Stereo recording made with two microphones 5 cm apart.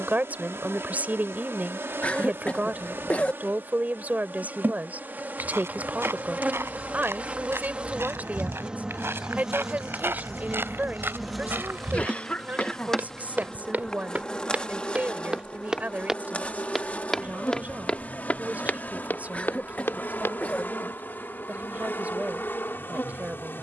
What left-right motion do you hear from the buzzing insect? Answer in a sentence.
In this clip you hear the buzzing insect move to the left.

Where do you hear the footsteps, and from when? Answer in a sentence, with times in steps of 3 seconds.
You can hear the footsteps not at all from 0 s, on the right from 3 s, in the centre from 15 s, on the left from 18 s and not at all from 21 s.